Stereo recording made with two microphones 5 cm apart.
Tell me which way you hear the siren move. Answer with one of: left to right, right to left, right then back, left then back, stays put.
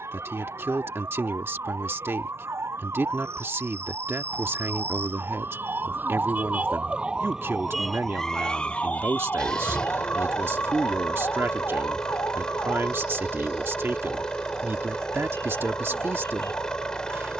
right to left.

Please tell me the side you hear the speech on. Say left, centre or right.
right.